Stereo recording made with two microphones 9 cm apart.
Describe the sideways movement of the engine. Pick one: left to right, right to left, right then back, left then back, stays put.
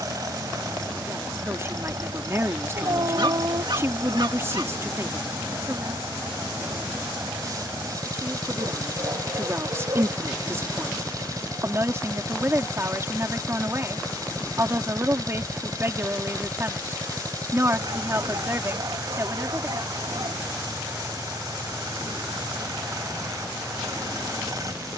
stays put.